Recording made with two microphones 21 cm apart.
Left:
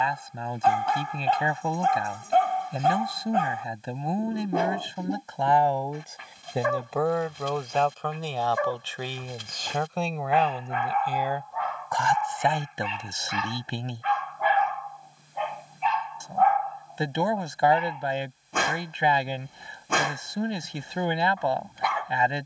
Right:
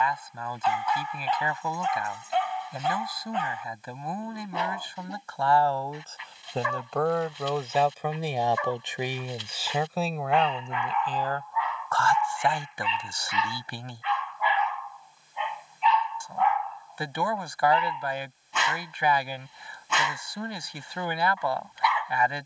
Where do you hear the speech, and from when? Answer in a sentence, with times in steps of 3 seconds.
You can hear the speech on the left from 0 s, in the centre from 6 s and on the left from 12 s.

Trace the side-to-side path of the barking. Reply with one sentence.
In this clip you hear the barking stay in one place.